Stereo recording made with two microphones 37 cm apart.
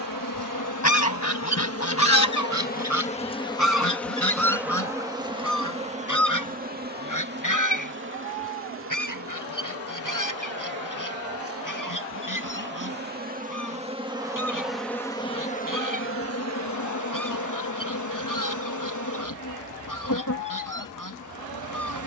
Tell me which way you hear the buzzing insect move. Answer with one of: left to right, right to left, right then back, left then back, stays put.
right then back.